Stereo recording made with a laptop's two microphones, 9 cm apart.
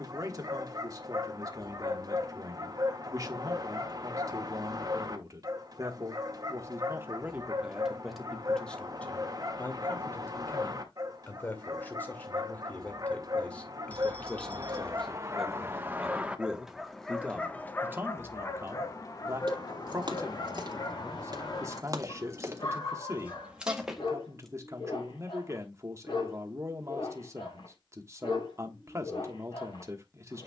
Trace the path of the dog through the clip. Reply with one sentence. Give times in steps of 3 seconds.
In this clip you hear the dog on the right from 0 s, in the centre from 15 s and on the left from 18 s.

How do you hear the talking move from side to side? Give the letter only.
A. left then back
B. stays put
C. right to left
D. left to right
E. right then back
A.